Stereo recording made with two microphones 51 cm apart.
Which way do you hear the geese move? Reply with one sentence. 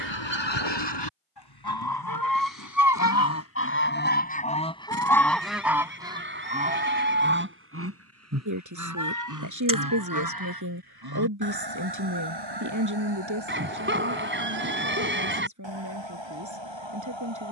In this clip you hear the geese travel towards the right.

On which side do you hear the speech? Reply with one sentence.
In this clip you hear the speech on the right.